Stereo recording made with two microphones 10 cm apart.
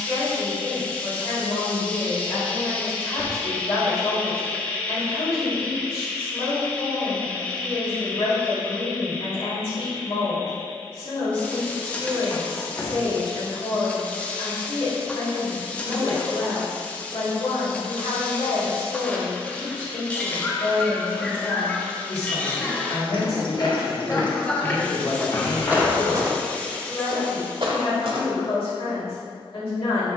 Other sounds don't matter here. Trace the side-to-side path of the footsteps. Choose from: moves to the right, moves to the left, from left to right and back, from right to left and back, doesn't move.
moves to the right.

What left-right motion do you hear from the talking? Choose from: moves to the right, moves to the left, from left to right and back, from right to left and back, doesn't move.
doesn't move.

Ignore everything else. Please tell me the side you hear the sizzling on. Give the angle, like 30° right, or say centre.
10° left.